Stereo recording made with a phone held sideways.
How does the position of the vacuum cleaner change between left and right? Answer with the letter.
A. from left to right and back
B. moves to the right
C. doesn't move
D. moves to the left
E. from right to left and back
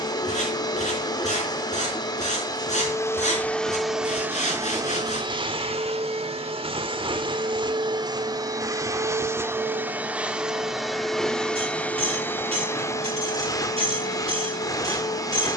A.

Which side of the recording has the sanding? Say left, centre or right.
left.